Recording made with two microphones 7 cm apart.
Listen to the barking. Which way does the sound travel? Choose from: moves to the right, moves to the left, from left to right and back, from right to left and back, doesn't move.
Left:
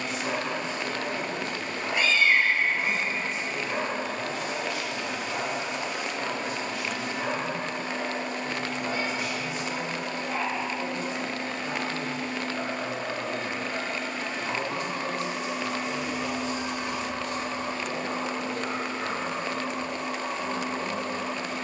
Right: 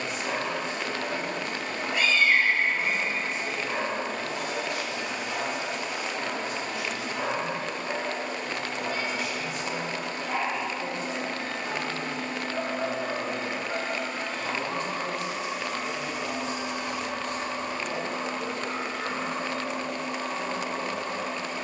from left to right and back.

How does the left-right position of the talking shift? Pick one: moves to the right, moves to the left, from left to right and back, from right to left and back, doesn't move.
from right to left and back.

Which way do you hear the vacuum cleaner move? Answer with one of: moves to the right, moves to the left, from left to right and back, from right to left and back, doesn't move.
moves to the left.